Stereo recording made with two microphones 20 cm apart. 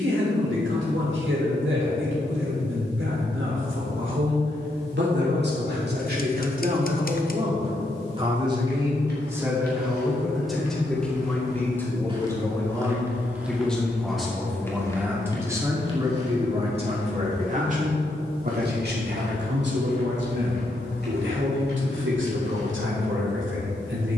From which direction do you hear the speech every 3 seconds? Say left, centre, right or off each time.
right, right, right, centre, centre, right, right, right.